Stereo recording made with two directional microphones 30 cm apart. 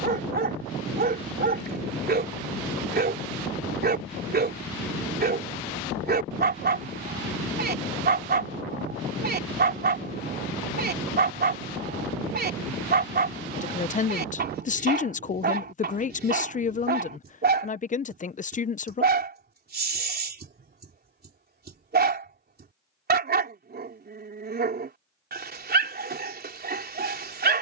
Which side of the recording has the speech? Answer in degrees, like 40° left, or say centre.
30° left.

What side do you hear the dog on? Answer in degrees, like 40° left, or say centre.
30° right.